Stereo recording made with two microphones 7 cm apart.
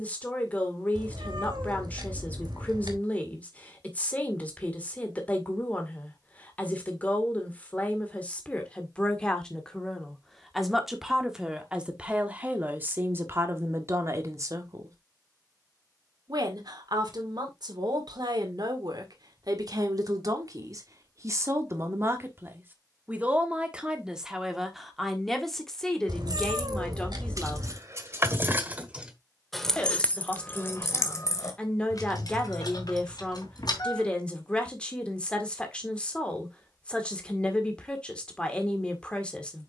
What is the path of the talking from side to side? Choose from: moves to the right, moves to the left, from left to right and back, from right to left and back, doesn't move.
from left to right and back.